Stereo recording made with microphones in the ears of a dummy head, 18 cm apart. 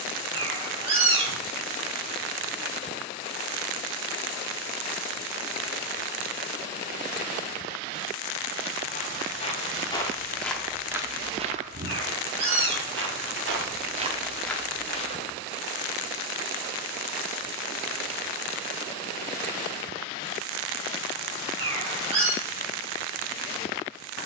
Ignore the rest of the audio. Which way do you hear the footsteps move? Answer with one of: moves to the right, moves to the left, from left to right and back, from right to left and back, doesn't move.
from left to right and back.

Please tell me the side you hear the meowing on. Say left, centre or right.
right.